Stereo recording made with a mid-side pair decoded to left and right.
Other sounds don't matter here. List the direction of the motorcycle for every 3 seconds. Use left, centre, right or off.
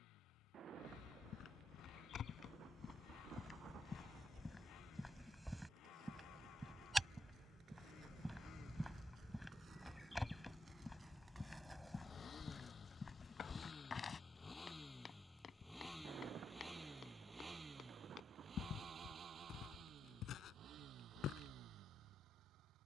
left, left, left, left, left, centre, right, right.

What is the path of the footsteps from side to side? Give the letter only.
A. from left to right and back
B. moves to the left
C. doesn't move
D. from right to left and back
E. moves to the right
A.